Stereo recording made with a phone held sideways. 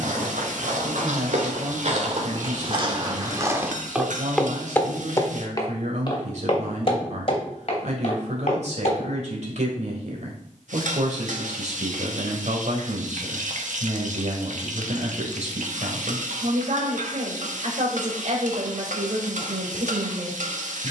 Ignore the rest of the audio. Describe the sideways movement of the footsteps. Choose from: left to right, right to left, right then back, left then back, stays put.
right to left.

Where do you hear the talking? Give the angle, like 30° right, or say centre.
60° right.